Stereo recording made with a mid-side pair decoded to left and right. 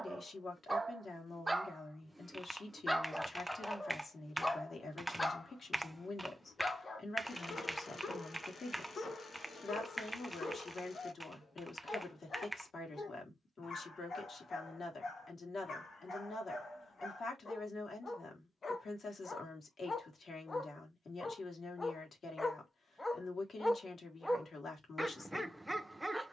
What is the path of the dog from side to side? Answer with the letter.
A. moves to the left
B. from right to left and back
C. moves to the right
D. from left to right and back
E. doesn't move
B.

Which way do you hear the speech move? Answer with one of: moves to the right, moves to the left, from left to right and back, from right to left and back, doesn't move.
doesn't move.